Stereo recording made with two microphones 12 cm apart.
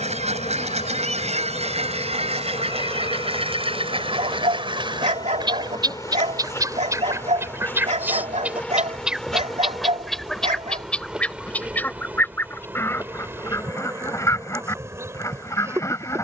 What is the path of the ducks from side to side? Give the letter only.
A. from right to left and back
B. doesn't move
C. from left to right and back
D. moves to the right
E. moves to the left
E.